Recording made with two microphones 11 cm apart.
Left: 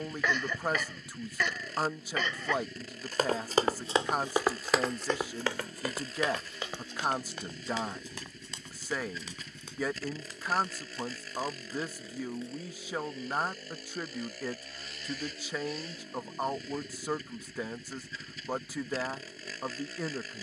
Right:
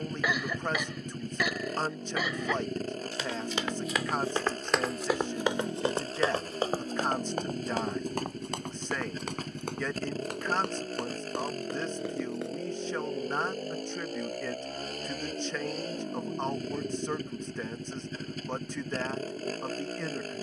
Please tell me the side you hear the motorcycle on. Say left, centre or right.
right.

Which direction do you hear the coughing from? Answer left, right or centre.
centre.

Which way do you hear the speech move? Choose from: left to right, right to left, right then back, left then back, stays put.
stays put.